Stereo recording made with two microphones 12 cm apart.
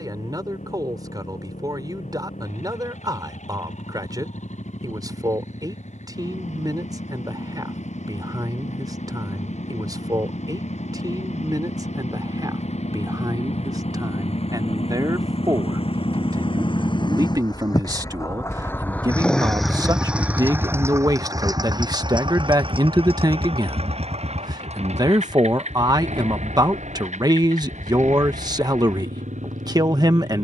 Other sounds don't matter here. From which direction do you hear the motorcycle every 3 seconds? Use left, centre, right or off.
left, left, left, left, left, left, centre, right, right, right.